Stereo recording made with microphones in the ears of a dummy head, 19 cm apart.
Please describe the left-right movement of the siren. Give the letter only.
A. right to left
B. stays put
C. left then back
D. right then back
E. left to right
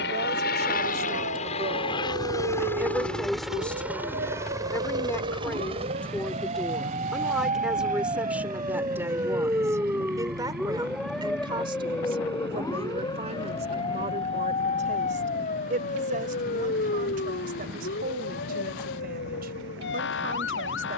A.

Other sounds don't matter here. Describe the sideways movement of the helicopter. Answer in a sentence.
You can hear the helicopter travel towards the right.